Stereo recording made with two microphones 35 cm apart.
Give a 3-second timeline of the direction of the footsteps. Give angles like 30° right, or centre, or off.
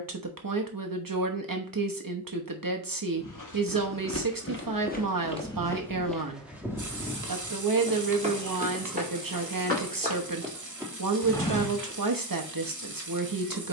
off, 30° left, 10° right, 10° right, off.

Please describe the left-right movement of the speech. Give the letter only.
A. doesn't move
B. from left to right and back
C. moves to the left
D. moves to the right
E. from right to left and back
A.